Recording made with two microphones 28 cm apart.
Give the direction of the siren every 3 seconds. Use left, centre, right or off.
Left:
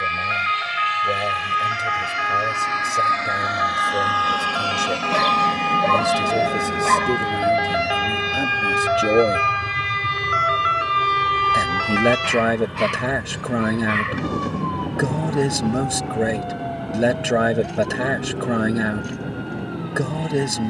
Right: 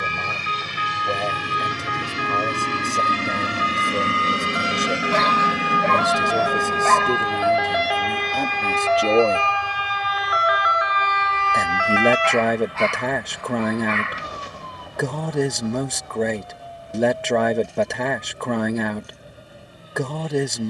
right, right, centre, left, left, left, left.